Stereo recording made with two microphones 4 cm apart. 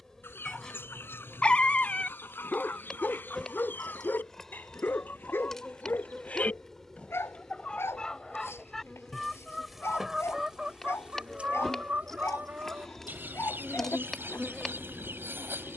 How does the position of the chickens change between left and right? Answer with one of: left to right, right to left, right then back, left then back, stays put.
left to right.